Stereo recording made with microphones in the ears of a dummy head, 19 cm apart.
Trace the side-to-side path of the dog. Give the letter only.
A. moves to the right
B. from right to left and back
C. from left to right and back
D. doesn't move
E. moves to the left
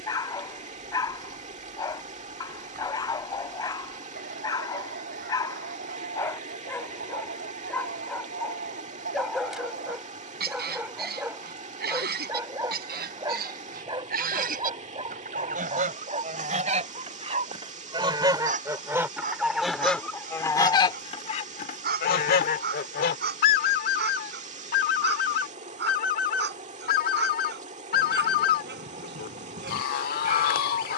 A.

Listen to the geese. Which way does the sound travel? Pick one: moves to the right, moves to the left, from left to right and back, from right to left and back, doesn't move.
moves to the left.